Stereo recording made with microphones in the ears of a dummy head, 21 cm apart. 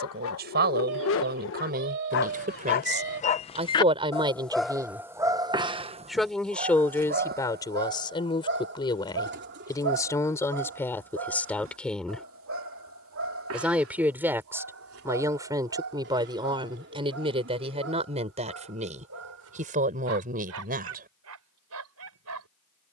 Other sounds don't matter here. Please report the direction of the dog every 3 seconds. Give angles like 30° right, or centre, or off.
60° left, centre, 40° right, 60° right, 70° right, 70° right, 70° right, 70° right.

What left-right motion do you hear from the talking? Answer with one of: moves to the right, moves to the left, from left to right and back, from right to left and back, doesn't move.
from right to left and back.